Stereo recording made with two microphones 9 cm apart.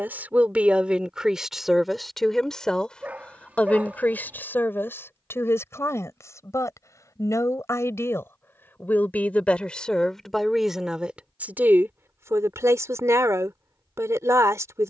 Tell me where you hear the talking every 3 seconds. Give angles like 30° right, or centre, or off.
centre, 20° left, 30° left, centre, 30° right.